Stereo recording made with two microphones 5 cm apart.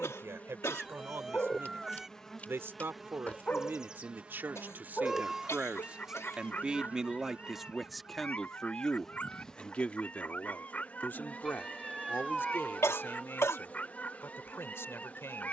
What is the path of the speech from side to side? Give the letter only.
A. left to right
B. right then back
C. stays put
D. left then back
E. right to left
E.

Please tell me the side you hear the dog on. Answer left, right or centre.
left.